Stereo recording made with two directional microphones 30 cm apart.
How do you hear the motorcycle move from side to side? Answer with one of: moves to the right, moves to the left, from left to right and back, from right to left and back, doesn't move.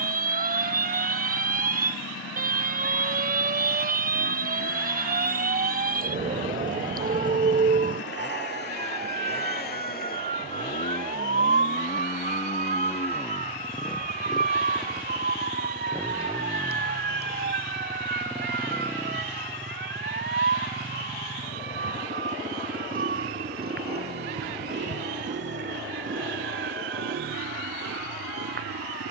moves to the right.